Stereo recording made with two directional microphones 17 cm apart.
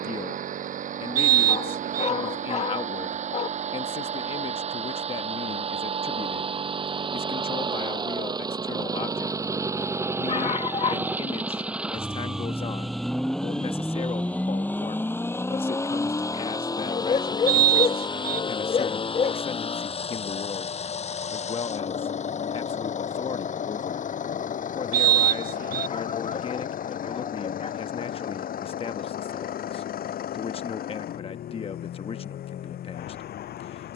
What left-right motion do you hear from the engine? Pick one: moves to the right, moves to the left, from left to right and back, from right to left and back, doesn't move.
moves to the left.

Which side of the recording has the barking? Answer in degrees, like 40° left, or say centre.
40° left.